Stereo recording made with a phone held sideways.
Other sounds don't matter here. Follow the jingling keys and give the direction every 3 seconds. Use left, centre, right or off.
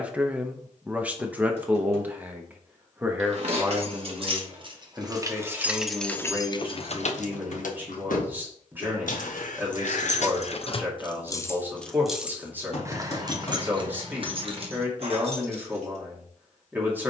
off, right, left, left, right, right.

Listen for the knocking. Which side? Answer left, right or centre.
left.